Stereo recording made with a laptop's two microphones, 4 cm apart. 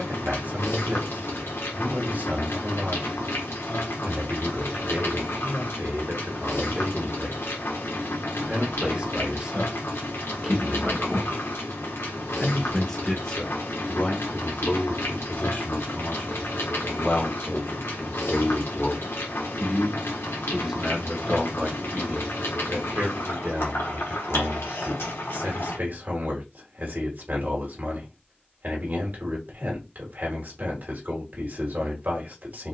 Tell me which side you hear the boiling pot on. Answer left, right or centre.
left.